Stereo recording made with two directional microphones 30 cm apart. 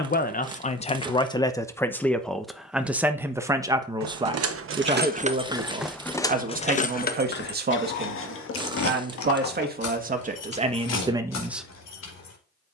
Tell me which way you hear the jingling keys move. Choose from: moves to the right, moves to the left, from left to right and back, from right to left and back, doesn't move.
moves to the left.